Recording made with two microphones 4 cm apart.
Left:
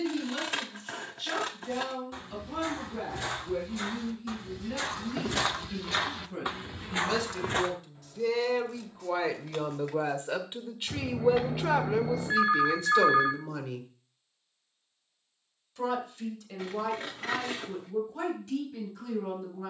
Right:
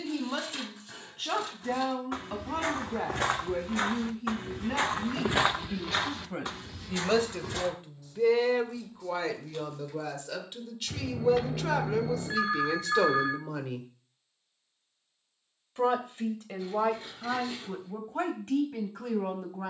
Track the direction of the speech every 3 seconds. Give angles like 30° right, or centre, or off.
50° right, 50° right, 30° right, 20° left, centre, 40° right, 50° right.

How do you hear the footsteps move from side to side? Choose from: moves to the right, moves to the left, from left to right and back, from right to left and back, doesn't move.
moves to the left.